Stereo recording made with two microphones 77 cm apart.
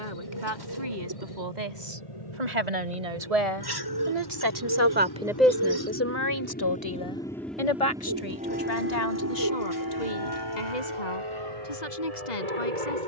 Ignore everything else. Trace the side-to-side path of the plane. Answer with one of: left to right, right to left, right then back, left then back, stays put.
left to right.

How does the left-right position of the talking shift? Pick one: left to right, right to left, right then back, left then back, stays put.
right to left.